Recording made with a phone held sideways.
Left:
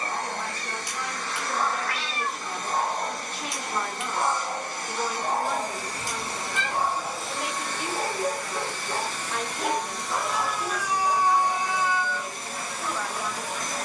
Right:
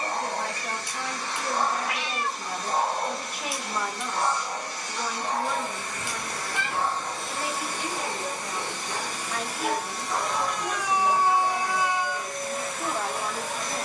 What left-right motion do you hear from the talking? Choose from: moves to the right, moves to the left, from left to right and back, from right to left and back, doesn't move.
from right to left and back.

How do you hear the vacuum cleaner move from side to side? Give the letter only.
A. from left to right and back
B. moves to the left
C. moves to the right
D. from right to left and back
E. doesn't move
A.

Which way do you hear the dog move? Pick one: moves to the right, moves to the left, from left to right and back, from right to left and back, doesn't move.
from right to left and back.